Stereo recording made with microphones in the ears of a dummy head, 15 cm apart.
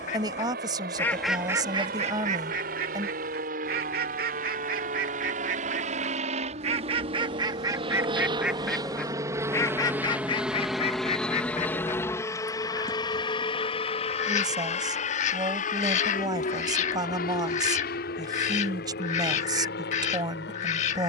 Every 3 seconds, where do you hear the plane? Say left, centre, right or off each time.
right, right, right, centre, left, left, left.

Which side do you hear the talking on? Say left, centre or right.
right.